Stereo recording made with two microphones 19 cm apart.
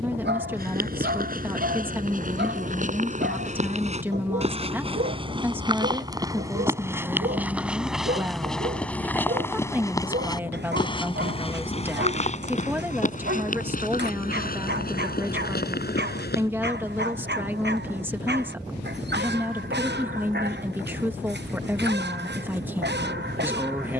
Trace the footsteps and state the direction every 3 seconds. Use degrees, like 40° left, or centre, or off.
50° right, 30° right, 10° right, 20° left, 40° left, 60° left, off, off.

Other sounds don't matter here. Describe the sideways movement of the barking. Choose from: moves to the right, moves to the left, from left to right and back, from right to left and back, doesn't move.
doesn't move.